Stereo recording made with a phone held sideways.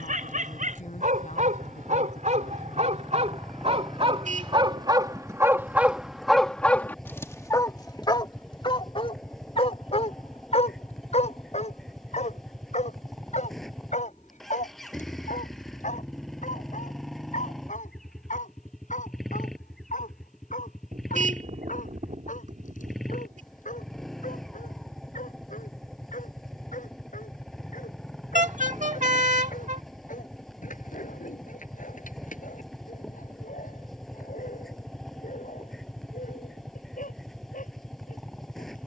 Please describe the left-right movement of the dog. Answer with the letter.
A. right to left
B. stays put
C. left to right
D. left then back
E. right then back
A.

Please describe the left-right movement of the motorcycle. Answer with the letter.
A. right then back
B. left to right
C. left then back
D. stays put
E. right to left
D.